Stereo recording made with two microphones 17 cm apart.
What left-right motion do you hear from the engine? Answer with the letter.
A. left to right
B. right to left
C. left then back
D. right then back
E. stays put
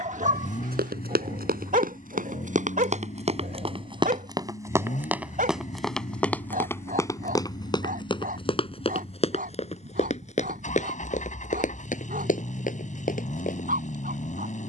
E.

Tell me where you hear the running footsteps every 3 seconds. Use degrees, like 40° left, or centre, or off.
60° right, 20° right, 20° left, 40° left, 50° left.